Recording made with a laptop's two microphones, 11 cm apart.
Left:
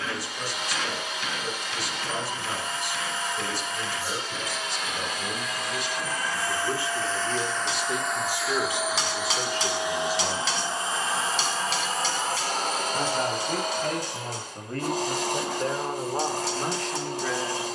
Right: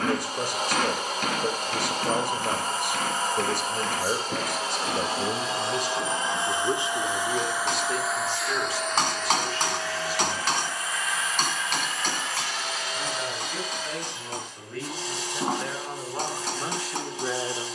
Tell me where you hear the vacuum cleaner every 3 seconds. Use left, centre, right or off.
right, right, centre, left, left, left.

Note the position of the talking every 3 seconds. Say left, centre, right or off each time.
right, right, centre, left, left, centre.